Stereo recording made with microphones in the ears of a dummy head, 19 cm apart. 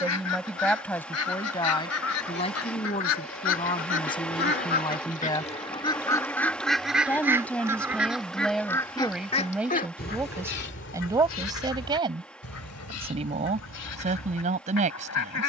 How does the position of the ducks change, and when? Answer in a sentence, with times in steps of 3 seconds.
In this clip you hear the ducks on the left from 0 s, in the centre from 6 s and on the left from 9 s.